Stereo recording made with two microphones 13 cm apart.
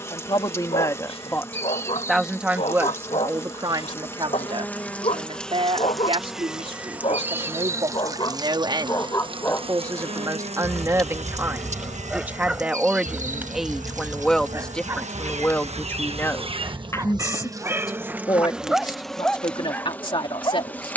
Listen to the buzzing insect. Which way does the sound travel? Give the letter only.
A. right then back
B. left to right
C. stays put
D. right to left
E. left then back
A.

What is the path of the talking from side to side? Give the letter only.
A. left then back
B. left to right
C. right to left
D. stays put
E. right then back
E.